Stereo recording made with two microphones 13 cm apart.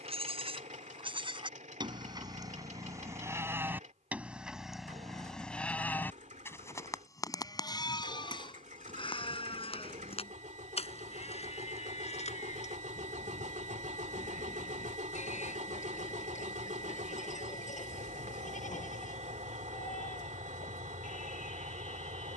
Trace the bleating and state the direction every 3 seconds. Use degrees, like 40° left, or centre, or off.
40° right, centre, 30° left, 50° left, 60° left, 70° left, 70° left, 70° left.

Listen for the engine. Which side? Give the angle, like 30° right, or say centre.
70° right.